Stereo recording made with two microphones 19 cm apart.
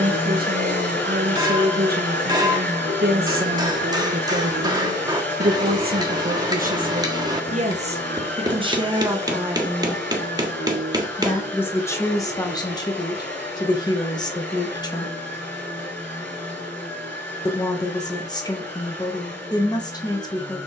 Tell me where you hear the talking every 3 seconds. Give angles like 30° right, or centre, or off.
60° right, 60° right, 40° right, centre, 20° left, 20° left, 20° left.